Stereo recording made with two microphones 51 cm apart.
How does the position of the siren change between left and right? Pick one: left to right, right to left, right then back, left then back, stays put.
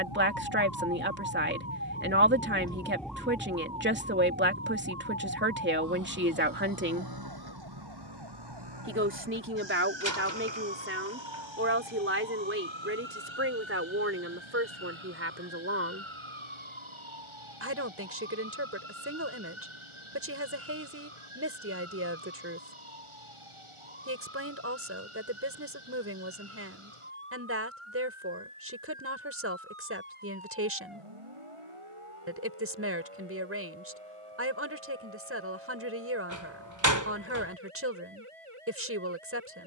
left to right.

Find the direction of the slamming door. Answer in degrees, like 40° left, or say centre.
30° right.